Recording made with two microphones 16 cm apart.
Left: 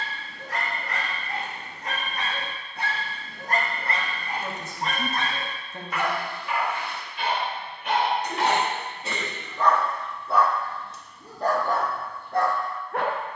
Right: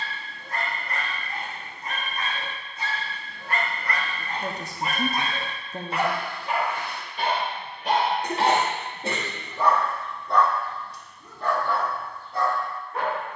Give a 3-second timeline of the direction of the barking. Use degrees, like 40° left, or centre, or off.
70° left, 10° left, 30° right, 20° left, 60° left.